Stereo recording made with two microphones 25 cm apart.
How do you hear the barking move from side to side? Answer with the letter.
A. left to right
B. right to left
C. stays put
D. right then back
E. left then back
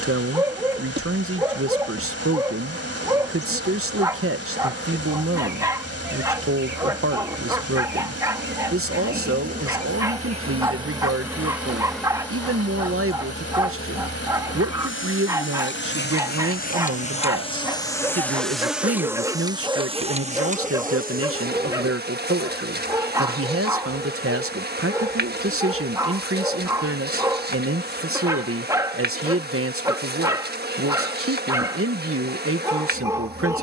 C.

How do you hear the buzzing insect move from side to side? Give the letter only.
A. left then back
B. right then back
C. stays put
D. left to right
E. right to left
A.